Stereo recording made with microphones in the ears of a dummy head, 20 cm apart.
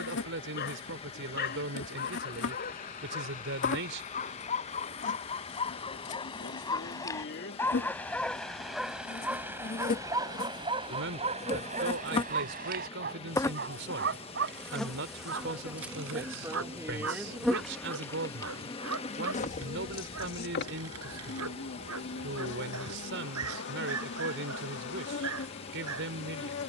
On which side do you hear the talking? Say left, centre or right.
right.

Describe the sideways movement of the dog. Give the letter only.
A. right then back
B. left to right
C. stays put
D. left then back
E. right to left
B.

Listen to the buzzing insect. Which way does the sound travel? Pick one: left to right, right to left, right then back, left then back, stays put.
right then back.